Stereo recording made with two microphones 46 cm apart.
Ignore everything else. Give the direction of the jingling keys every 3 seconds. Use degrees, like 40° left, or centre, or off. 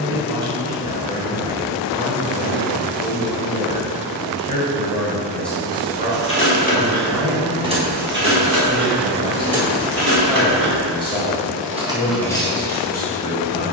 off, off, 10° right, 40° right, 10° left.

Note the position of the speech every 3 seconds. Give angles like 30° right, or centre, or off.
50° left, 30° left, 30° right, centre, 40° left.